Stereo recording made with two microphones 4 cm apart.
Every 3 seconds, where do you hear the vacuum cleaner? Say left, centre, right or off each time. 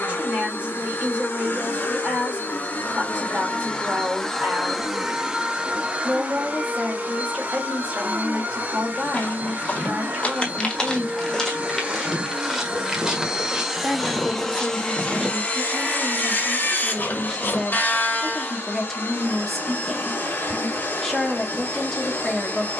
left, centre, right, right, centre, left, left, left.